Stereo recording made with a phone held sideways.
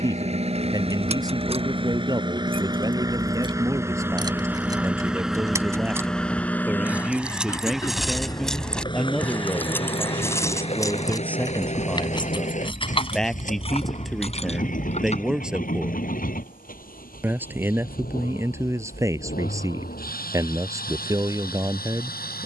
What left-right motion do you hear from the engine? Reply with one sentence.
You can hear the engine go from the right side to the left.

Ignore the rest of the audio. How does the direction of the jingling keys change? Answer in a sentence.
You can hear the jingling keys travel towards the left.